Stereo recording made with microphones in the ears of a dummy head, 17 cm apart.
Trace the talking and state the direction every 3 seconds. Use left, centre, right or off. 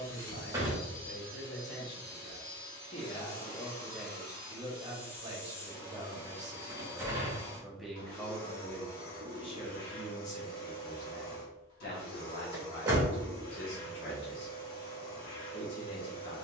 left, centre, centre, left, left, left.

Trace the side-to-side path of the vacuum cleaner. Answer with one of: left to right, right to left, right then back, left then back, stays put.
stays put.